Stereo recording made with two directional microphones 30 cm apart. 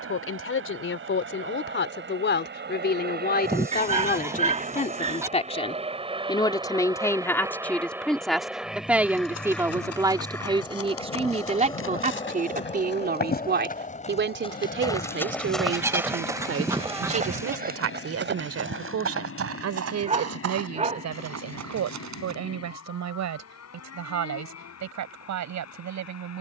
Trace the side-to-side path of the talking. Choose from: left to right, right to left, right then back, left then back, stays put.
left to right.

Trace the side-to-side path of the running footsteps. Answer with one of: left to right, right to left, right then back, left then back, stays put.
left to right.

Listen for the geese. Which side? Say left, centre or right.
centre.